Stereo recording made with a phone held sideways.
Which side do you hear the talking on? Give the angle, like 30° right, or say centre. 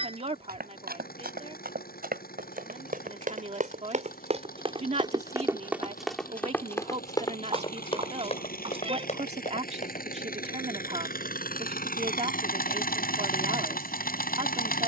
40° right.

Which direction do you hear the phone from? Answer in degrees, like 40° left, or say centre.
40° right.